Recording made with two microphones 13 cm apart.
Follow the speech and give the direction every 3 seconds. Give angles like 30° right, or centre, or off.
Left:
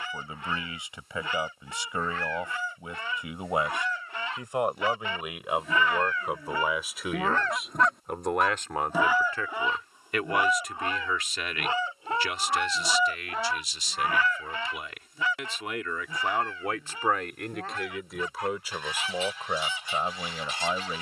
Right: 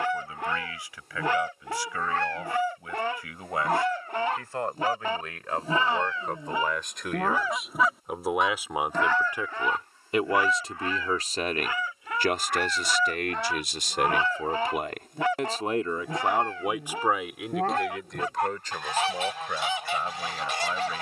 20° left, 20° left, centre, 30° right, 60° right, 20° right, 20° left.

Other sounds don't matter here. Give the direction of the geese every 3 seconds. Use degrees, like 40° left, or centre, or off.
70° right, 50° right, 20° right, 20° left, centre, 70° right, 70° right.